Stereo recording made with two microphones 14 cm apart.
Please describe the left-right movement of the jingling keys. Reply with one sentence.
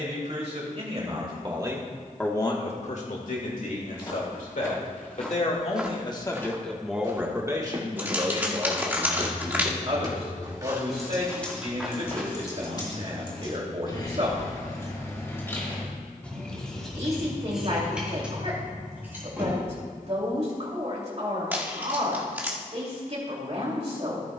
You can hear the jingling keys go left and come back.